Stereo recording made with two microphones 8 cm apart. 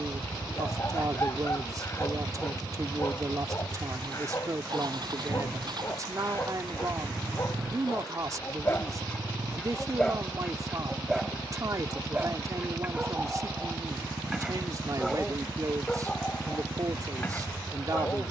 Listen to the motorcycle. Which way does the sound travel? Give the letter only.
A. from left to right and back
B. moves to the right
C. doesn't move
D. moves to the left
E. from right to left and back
C.